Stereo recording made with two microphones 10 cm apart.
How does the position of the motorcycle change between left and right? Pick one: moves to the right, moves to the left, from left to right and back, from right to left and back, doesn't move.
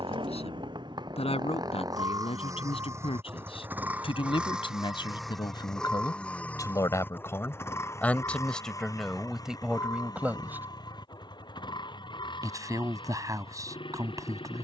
moves to the left.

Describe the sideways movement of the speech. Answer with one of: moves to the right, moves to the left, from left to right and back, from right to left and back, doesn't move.
moves to the right.